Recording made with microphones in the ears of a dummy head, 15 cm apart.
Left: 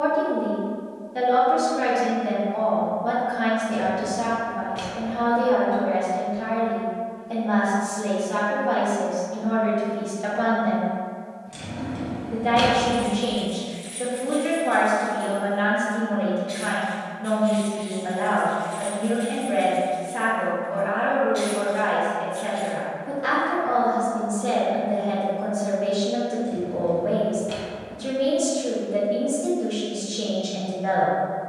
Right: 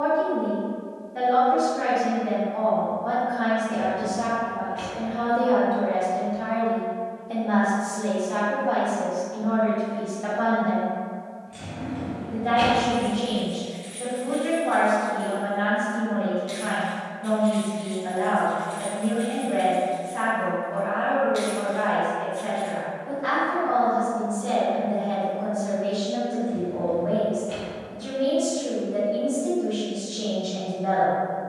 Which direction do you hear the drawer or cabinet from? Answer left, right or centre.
left.